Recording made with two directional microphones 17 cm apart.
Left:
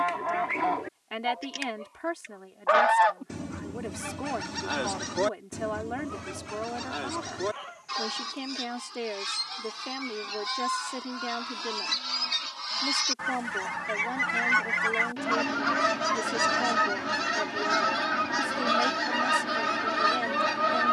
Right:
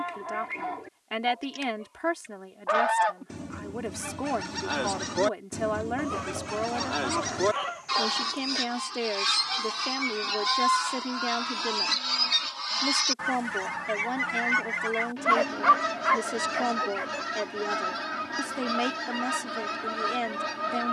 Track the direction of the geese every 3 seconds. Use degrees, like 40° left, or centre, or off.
40° left, centre, 30° right, 30° right, centre, 30° left, 30° left.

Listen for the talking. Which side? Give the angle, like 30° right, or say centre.
20° right.